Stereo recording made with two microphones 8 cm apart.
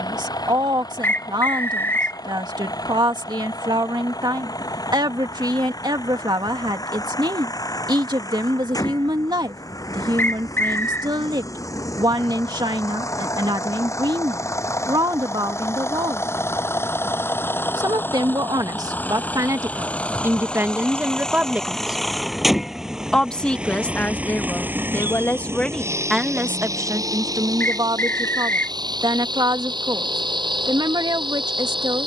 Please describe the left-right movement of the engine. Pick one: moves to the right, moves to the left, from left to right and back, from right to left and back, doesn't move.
moves to the right.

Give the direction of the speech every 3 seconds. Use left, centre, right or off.
right, right, right, right, right, right, right, centre, centre, right, right.